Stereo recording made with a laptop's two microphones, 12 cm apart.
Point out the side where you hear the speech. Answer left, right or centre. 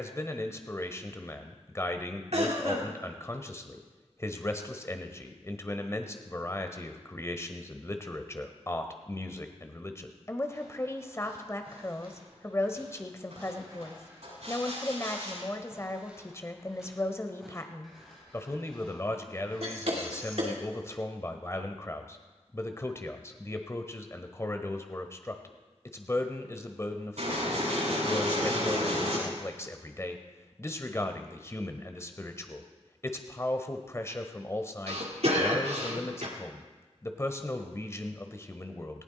left.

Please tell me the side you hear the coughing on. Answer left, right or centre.
right.